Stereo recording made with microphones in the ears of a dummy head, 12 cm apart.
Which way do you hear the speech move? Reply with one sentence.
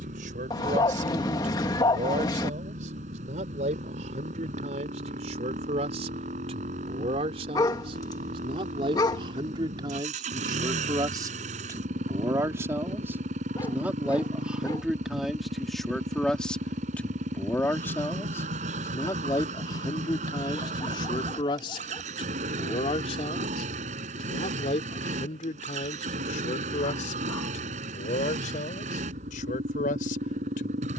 You can hear the speech travel towards the left.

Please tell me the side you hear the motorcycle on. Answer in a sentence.
In this clip you hear the motorcycle on the right.